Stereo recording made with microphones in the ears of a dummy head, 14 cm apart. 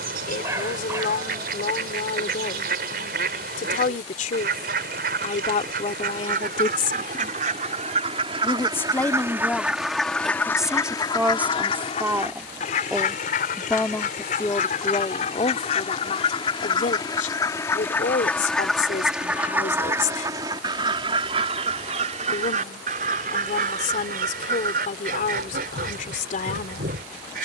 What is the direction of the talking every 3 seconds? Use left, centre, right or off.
left, left, left, centre, centre, left, left, left, left.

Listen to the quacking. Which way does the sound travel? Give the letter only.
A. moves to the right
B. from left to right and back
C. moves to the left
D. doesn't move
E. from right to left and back
E.